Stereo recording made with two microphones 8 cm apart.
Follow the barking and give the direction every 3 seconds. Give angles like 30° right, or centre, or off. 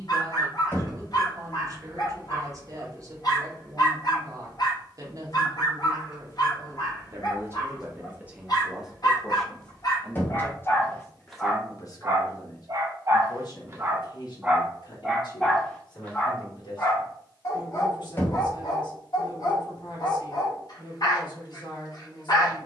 60° left, 60° left, 60° left, 40° left, 30° right, 20° left, 50° left, 50° left.